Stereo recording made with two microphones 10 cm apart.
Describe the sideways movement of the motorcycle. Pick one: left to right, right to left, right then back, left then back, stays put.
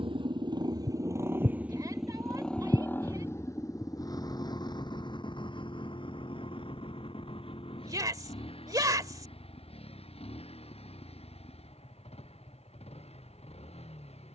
right to left.